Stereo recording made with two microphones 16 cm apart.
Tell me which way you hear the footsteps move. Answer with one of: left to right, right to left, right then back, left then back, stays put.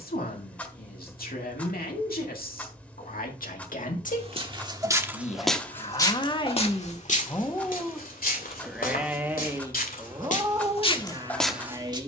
left then back.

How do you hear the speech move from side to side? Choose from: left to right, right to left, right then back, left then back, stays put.
left to right.